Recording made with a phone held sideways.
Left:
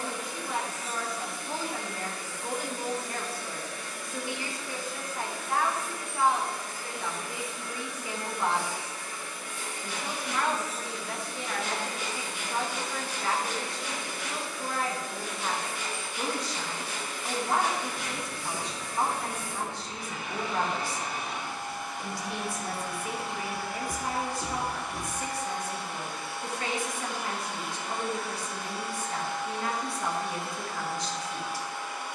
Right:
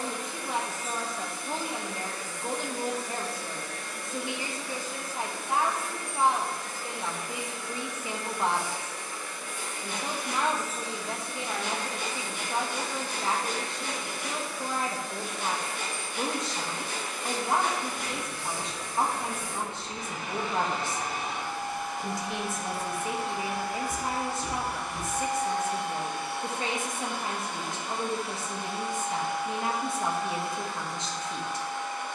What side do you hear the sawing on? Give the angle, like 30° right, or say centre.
50° right.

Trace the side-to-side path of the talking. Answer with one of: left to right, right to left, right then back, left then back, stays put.
stays put.